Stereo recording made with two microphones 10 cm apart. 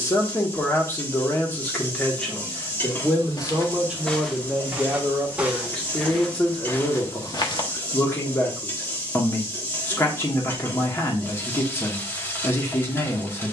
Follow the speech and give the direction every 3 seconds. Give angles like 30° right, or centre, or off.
20° left, centre, 20° left, 20° left, 20° left.